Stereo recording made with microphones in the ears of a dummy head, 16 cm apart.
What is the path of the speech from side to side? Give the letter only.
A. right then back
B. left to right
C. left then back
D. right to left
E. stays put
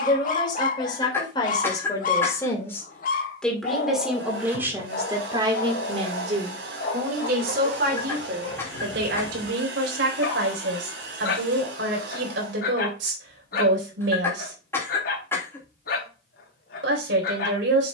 B.